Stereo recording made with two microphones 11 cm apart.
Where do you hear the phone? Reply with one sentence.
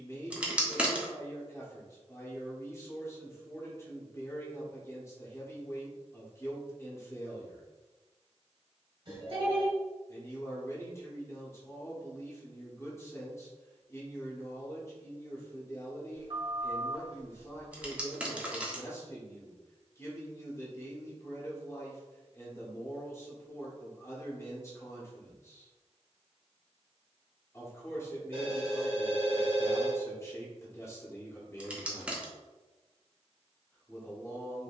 You can hear the phone on the right.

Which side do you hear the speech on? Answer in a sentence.
You can hear the speech on the left.